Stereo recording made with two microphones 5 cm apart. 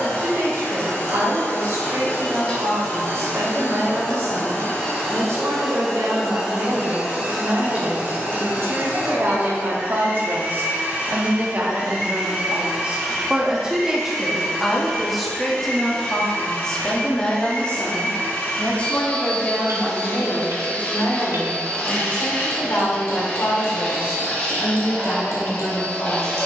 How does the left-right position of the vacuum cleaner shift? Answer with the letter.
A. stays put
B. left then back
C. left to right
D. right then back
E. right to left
D.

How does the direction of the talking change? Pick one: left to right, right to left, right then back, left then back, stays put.
right to left.